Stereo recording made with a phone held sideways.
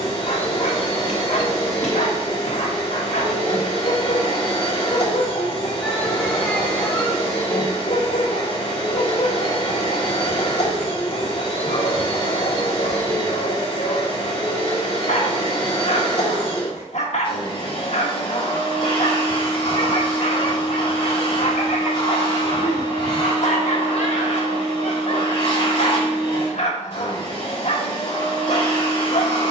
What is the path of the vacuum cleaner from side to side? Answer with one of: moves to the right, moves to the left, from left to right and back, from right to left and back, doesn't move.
doesn't move.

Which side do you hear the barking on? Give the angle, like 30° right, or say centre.
60° left.